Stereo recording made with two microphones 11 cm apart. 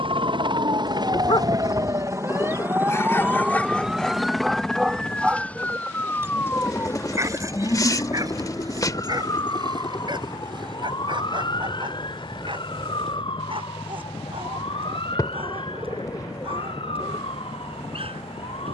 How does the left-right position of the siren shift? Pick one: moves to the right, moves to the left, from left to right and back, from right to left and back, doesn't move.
moves to the left.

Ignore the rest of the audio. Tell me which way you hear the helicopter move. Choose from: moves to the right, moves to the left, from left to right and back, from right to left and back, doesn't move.
moves to the left.